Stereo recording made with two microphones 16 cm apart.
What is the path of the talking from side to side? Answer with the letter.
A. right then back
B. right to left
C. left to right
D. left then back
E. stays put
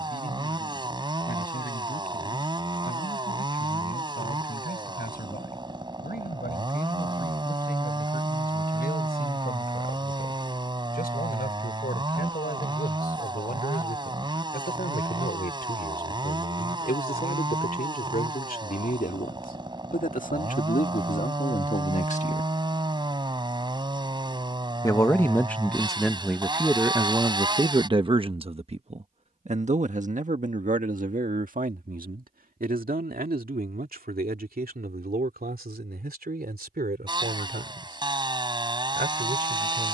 C.